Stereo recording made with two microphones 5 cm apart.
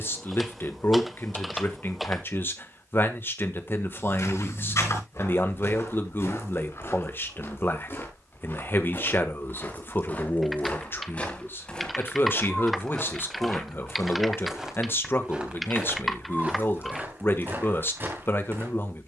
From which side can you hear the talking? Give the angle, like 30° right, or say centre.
40° left.